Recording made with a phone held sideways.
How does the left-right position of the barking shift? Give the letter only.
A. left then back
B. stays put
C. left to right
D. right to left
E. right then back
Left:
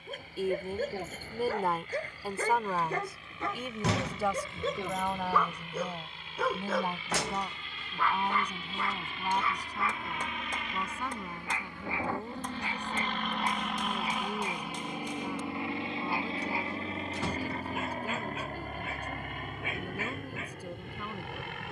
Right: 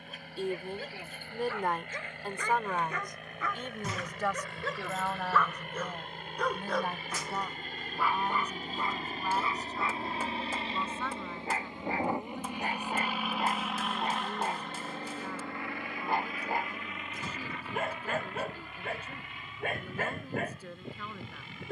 C.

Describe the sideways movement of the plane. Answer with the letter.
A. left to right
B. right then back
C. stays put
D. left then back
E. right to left
E.